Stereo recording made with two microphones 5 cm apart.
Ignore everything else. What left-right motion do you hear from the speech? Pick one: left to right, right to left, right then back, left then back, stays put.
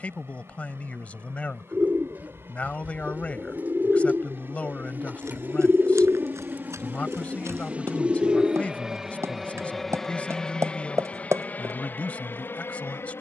stays put.